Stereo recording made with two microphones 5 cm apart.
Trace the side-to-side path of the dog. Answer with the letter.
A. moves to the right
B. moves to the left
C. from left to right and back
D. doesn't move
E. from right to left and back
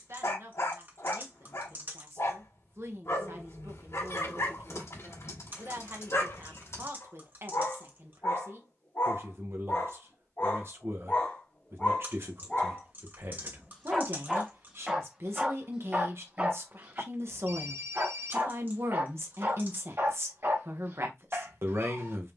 A.